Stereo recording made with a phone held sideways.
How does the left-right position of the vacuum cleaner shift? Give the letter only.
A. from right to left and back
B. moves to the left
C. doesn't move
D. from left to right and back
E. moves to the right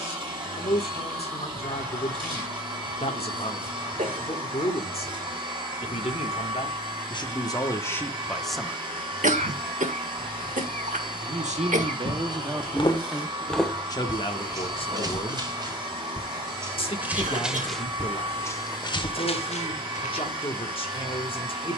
C.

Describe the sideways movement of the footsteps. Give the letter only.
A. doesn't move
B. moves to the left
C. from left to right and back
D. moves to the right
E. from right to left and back
C.